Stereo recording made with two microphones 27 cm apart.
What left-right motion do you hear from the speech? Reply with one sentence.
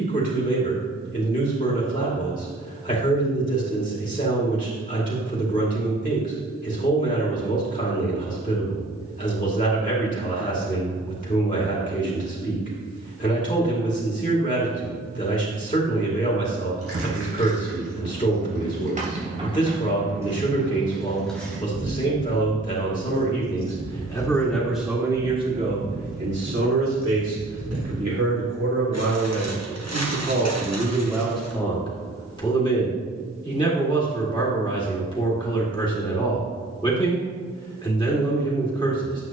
You can hear the speech move from left to right and back again.